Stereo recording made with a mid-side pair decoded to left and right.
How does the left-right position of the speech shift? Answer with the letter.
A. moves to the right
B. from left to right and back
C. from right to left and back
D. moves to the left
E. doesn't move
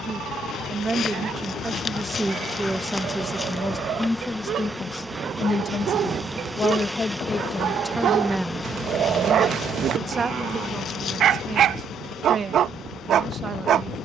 C.